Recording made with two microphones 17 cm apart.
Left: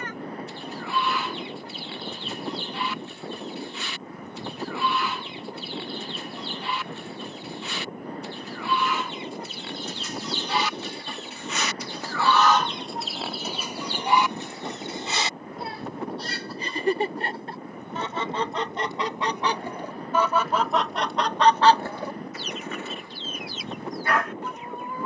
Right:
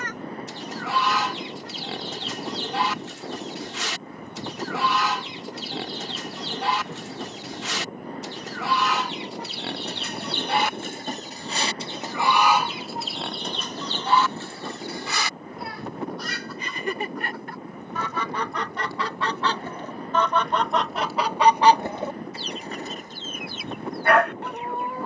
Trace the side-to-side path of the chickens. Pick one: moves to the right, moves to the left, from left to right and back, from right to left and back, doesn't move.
from right to left and back.